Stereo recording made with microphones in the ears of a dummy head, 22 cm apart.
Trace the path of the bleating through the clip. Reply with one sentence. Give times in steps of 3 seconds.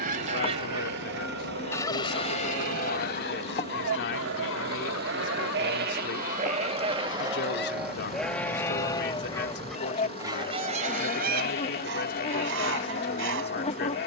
You can hear the bleating on the right from 0 s, in the centre from 6 s and on the left from 9 s.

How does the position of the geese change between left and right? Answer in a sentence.
In this clip you hear the geese go left and come back.